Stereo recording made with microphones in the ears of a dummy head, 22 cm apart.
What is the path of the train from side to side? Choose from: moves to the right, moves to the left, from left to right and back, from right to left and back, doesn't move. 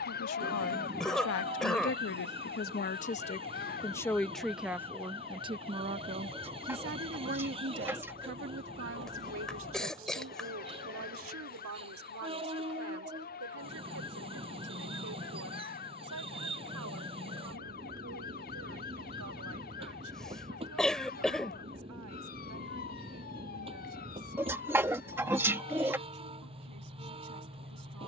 doesn't move.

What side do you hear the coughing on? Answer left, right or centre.
centre.